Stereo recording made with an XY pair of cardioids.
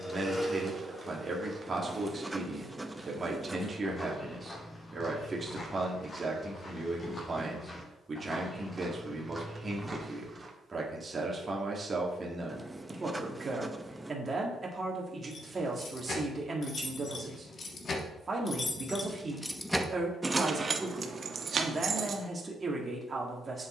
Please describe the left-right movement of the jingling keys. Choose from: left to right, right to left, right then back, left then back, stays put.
left to right.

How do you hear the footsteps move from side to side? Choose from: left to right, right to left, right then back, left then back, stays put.
left then back.